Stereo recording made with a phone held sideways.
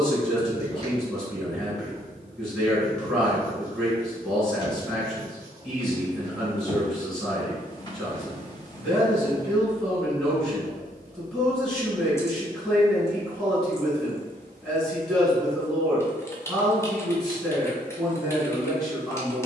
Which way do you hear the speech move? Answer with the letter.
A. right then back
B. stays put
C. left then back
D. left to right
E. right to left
B.